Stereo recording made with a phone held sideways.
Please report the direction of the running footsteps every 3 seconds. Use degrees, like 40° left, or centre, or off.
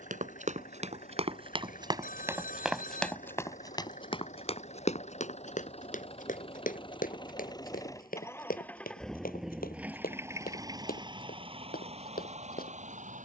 30° right, 40° left, 70° left, 70° left, 80° left.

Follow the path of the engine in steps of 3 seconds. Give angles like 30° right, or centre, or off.
60° left, 50° left, 30° left, 20° right, 50° right.